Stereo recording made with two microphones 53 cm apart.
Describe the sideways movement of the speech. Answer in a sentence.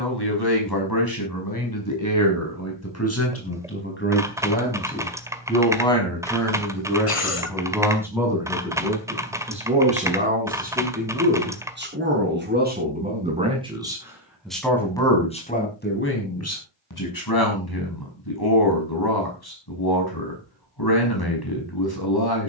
In this clip you hear the speech go right and come back.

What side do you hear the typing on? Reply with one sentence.
In this clip you hear the typing in the centre.